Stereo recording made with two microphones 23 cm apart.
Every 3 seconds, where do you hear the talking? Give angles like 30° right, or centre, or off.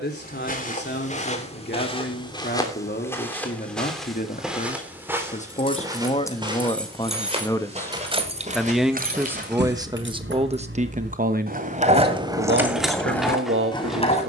50° left, 40° left, 20° left, 20° right, 60° right.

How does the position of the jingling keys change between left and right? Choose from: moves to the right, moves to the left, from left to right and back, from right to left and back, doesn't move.
from left to right and back.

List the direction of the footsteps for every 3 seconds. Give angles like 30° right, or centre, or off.
30° left, centre, 30° right, 40° right, off.